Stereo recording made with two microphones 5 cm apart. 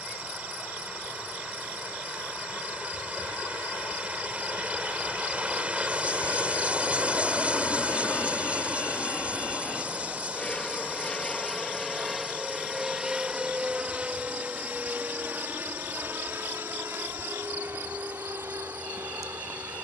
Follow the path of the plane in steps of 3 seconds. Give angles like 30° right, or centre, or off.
70° left, 60° left, 50° left, 20° left, 20° right, 40° right, 50° right.